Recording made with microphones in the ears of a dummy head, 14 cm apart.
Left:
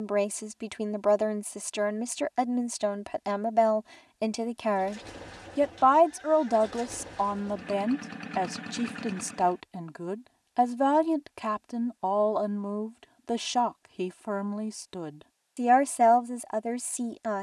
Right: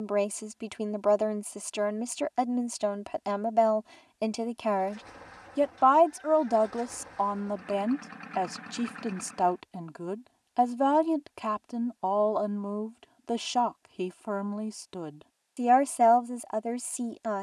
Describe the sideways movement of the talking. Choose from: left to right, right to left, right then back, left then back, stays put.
stays put.